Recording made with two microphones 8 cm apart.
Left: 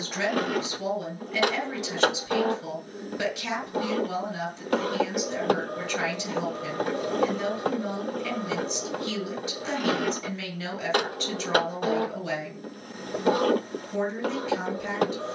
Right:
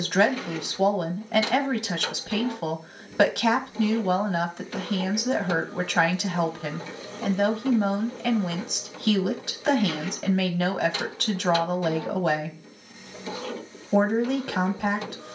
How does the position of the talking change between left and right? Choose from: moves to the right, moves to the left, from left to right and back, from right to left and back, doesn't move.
doesn't move.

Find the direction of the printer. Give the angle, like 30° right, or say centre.
60° left.